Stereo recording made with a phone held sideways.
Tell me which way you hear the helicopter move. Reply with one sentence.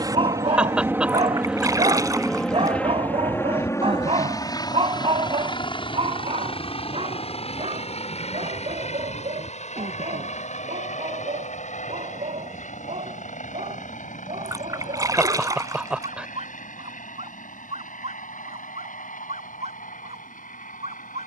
In this clip you hear the helicopter travel towards the left.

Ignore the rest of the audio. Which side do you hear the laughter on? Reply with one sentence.
In this clip you hear the laughter in the centre.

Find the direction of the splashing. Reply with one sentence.
You can hear the splashing on the right.